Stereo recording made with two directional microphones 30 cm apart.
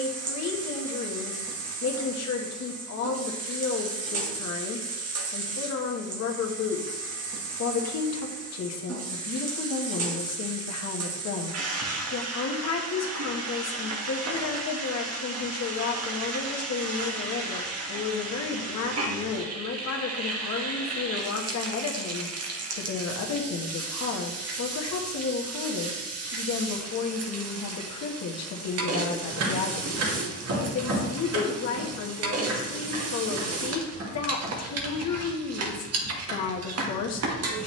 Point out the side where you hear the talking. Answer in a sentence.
In this clip you hear the talking on the left.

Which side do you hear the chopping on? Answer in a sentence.
You can hear the chopping on the right.